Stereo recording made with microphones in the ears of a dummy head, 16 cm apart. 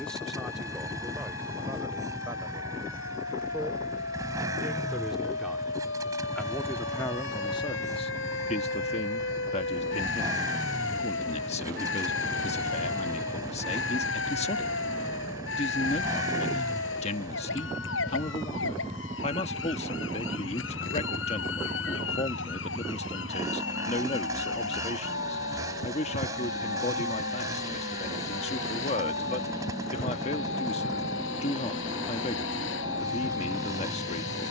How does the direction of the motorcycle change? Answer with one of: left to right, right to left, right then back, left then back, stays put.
stays put.